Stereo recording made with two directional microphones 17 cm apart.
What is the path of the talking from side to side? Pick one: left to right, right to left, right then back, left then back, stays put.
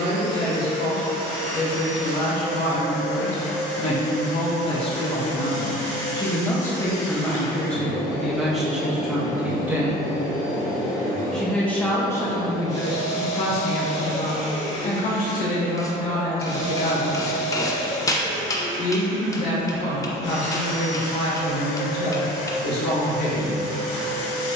right then back.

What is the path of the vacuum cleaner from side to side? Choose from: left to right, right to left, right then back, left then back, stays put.
stays put.